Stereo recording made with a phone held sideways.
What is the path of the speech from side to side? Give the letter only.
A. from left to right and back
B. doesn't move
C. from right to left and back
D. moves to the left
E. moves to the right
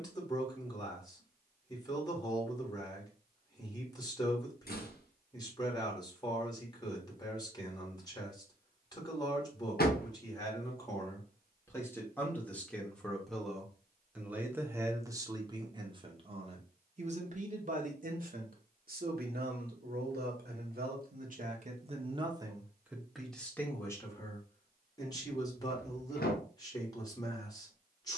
A.